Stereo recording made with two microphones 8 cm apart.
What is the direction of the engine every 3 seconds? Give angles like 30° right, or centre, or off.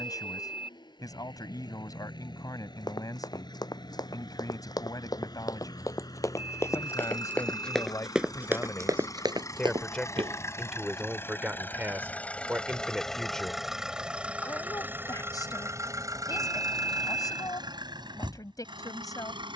60° left, 60° left, 50° left, 30° left, centre, 40° right, 70° right.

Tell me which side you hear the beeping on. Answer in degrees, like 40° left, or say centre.
60° left.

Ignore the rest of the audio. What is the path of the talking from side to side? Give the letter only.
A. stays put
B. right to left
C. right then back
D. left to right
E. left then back
C.